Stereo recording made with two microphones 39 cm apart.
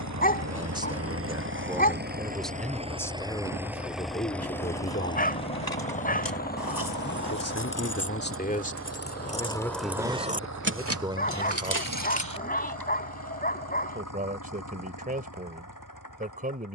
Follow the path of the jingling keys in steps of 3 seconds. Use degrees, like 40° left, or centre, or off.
off, 70° left, 50° left, 20° right, 60° right, off.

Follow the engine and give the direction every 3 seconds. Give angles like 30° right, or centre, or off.
30° right, centre, 30° left, 40° left, 50° left, 50° left.